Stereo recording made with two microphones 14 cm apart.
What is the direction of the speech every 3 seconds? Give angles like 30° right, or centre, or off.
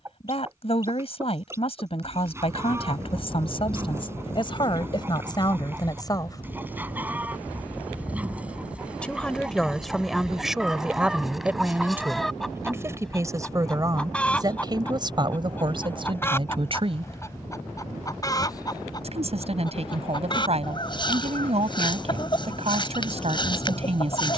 40° left, 30° left, 20° left, centre, 20° right, 40° right, 50° right, 50° right.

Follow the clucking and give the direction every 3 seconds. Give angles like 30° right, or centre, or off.
20° right, 20° right, 10° right, centre, 10° left, 20° left, 30° left, 30° left.